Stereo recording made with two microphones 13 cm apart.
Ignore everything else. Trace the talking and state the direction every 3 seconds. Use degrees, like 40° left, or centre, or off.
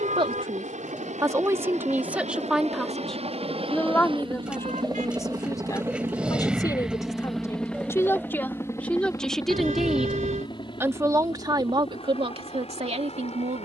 20° right, 20° left, 20° left, 10° right, 50° right.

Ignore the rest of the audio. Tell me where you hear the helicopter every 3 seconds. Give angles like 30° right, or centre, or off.
60° right, 40° right, centre, 30° left, 50° left.